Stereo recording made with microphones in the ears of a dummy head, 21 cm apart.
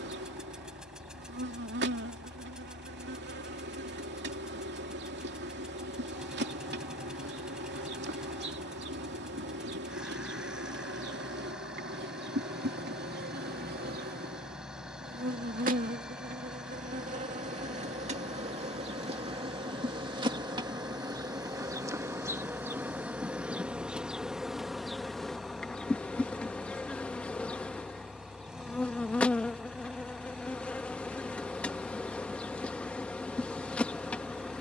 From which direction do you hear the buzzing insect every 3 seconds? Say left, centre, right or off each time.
right, right, right, right, right, right, right, centre, centre, centre, centre, centre.